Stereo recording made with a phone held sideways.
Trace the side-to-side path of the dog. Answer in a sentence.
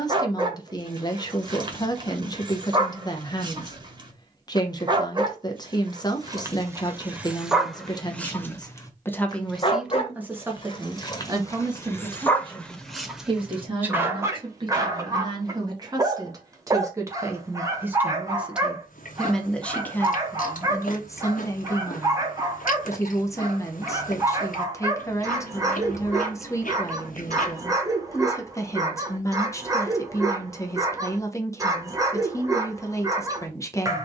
You can hear the dog move from right to left and back again.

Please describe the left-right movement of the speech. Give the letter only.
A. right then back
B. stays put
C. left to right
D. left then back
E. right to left
A.